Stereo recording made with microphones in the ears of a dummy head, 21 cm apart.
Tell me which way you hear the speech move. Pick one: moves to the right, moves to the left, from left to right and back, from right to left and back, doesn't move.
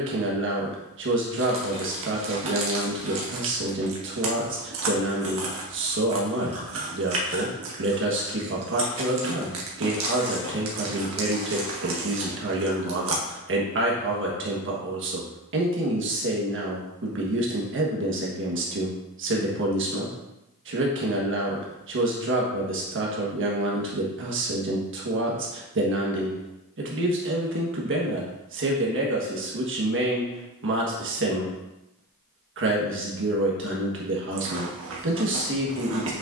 doesn't move.